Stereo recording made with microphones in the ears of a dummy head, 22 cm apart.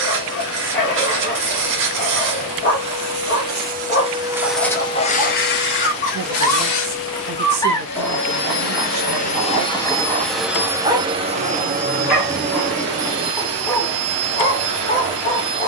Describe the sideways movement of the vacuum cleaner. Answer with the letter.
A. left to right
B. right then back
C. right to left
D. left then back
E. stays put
D.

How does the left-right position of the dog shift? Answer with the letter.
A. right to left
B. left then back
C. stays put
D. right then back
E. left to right
D.